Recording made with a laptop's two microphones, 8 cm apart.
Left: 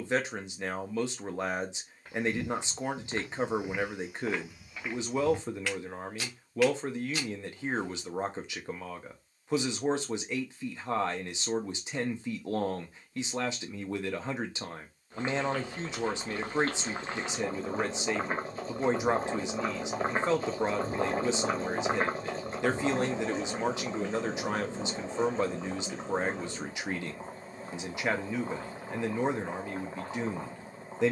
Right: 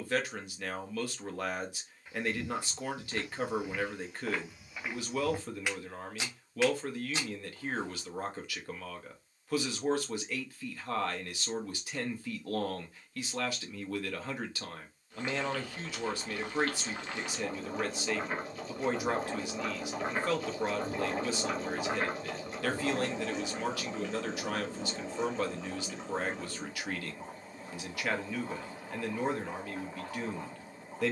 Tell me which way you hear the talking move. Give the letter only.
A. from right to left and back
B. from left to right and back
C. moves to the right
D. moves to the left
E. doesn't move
E.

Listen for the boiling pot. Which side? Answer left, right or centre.
left.